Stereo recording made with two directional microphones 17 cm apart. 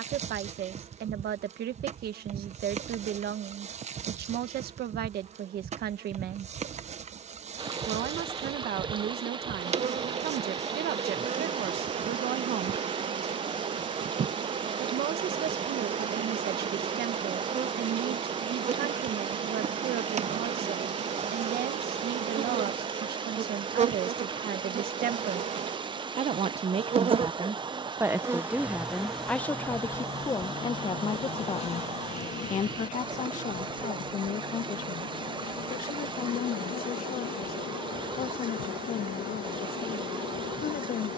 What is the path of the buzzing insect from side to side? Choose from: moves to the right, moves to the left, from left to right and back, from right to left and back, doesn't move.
moves to the left.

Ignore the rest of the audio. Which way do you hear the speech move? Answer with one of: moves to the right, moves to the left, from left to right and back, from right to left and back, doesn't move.
moves to the left.